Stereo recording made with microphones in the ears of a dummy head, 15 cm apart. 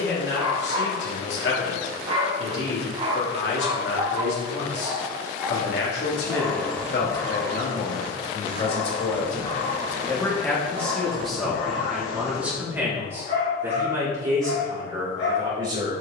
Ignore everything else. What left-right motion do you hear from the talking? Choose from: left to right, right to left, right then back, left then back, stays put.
left to right.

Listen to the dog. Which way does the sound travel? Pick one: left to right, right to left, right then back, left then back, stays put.
right to left.